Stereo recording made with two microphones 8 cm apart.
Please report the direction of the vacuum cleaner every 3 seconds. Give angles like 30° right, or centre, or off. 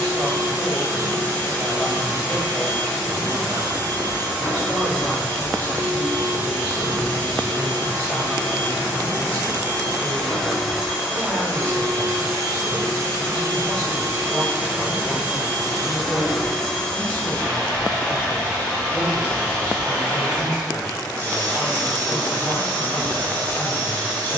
30° left, 30° left, 30° left, centre, 40° right, centre, 20° left, 20° left.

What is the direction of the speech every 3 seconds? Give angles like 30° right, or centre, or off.
10° left, 10° right, centre, 20° left, 20° left, 20° left, 20° left, 20° left.